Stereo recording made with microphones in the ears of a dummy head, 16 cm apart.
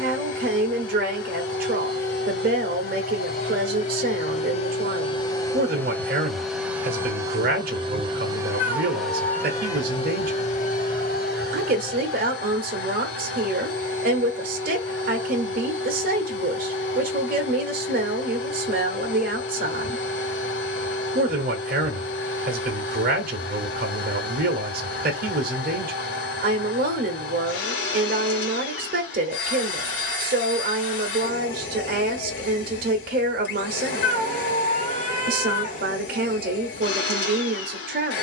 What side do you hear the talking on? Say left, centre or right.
right.